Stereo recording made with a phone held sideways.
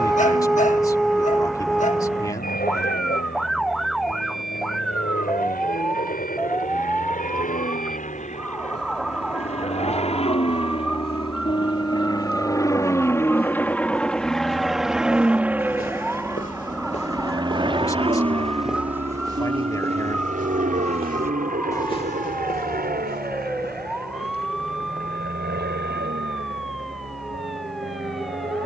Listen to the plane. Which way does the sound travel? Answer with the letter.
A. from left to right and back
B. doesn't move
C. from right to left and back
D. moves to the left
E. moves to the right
E.